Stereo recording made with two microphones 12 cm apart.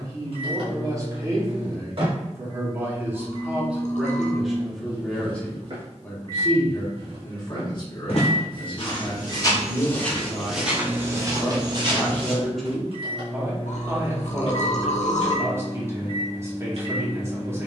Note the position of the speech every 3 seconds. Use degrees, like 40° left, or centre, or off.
30° right, centre, 30° left, 40° left, 10° right, 20° right.